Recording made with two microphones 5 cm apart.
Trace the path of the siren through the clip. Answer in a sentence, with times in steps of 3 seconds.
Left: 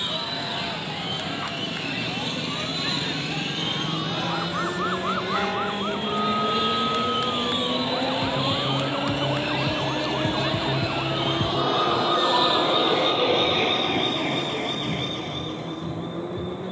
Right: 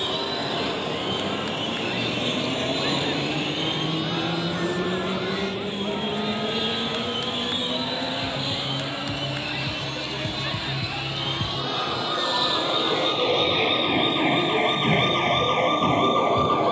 In this clip you hear the siren on the left from 0 s, in the centre from 12 s and on the right from 15 s.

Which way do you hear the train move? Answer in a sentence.
In this clip you hear the train move to the left.